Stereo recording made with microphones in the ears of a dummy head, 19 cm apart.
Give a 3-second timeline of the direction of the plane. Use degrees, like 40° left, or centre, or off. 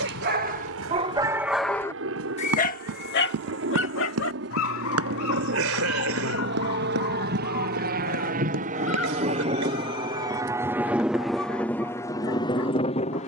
70° right, 60° right, 50° right, 10° right, 20° left.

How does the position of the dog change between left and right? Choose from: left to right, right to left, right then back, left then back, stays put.
right to left.